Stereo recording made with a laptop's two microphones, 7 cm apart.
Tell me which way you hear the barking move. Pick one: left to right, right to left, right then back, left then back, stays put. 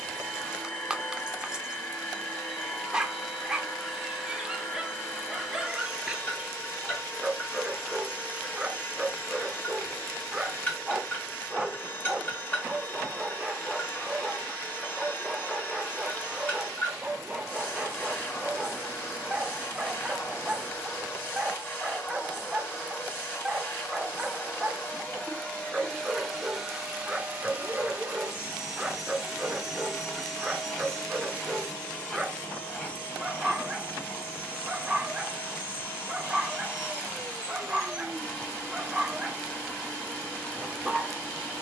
stays put.